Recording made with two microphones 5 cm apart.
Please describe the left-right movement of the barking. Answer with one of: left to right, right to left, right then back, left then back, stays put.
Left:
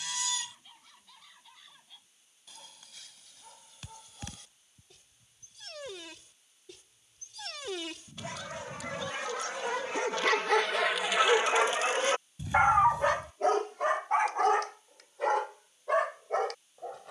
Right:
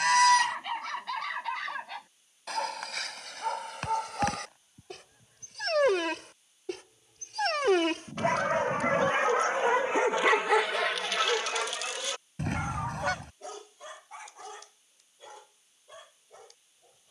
right to left.